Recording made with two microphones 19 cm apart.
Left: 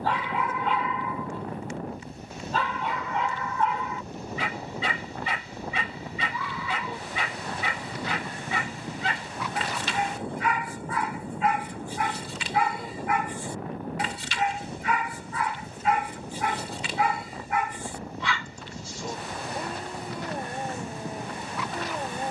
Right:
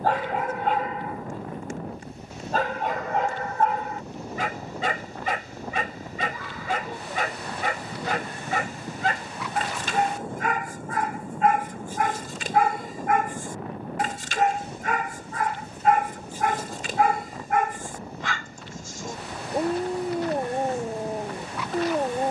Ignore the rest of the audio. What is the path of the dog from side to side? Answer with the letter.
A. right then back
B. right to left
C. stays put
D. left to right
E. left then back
C.